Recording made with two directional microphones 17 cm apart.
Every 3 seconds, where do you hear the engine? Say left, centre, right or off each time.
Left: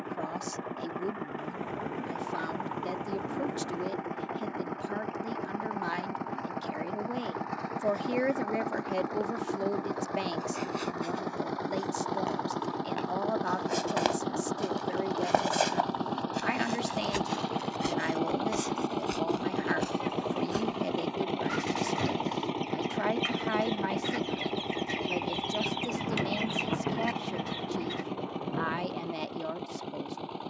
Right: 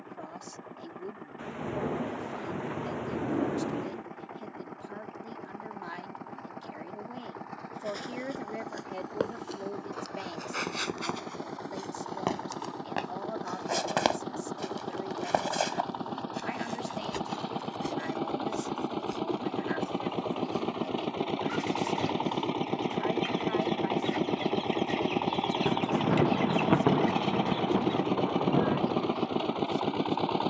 left, left, left, left, left, left, centre, centre, right, right.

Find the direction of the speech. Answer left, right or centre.
left.